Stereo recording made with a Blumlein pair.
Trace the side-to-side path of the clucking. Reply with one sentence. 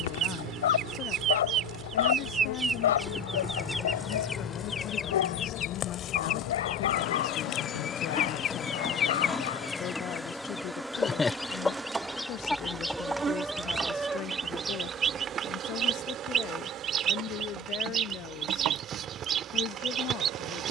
You can hear the clucking go left and come back.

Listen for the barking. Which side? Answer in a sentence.
You can hear the barking on the left.